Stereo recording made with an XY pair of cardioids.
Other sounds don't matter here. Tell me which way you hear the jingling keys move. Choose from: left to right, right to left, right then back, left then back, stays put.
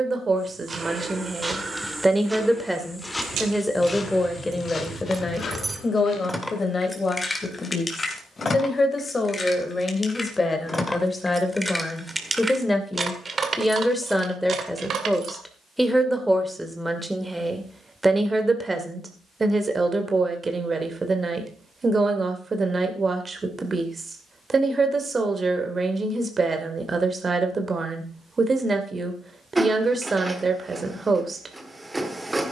left then back.